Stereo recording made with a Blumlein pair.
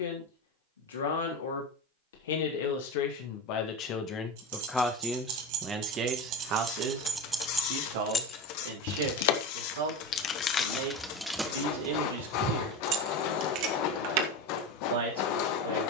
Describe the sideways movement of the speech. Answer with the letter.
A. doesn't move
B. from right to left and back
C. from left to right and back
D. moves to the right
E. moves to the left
D.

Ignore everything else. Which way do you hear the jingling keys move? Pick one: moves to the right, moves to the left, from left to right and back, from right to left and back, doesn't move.
from right to left and back.